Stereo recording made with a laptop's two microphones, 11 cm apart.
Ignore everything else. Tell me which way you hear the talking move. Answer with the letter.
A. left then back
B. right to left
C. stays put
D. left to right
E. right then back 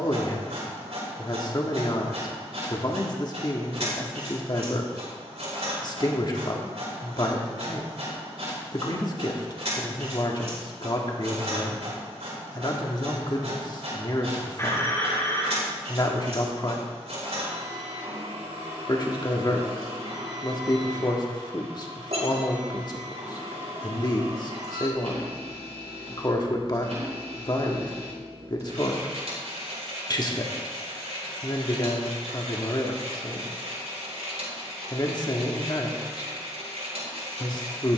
C.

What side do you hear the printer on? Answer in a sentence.
You can hear the printer on the right.